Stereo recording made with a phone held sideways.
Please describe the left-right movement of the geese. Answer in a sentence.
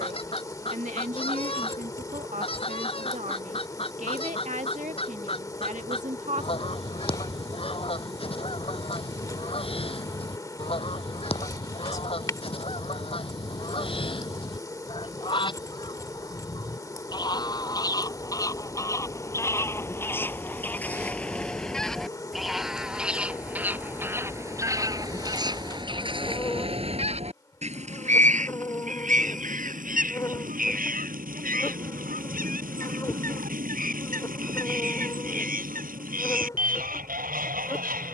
In this clip you hear the geese move to the right.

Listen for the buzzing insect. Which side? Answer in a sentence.
In this clip you hear the buzzing insect on the left.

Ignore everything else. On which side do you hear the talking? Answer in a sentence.
You can hear the talking on the right.